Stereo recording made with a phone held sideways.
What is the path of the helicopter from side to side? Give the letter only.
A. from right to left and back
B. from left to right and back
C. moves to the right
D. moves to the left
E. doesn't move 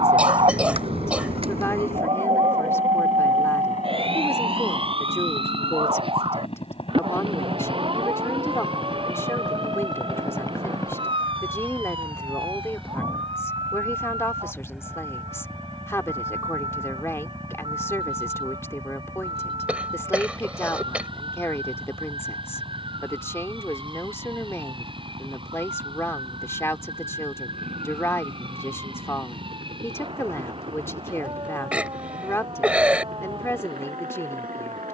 C.